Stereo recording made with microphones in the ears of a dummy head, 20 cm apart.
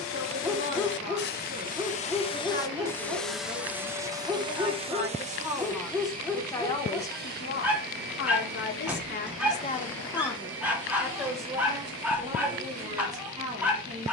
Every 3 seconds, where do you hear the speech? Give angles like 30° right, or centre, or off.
30° right, 20° right, 40° left, 10° left, 30° right.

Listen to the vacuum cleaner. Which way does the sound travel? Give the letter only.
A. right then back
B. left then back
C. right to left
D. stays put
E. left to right
E.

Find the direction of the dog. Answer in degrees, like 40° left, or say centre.
10° right.